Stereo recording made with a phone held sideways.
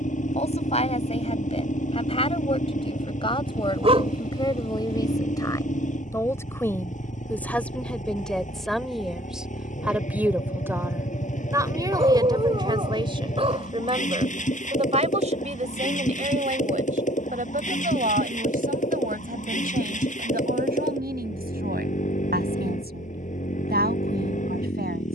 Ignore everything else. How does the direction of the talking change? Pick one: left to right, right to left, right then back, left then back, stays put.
left to right.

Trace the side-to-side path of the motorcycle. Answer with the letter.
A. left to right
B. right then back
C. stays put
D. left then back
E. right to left
C.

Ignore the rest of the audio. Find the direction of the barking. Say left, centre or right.
right.